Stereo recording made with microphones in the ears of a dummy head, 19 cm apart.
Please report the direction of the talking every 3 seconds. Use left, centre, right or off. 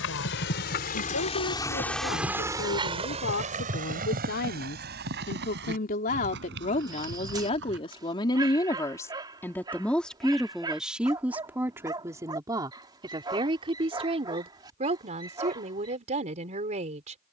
left, left, left, centre, right, right.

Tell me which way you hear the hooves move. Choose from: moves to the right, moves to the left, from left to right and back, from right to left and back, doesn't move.
moves to the right.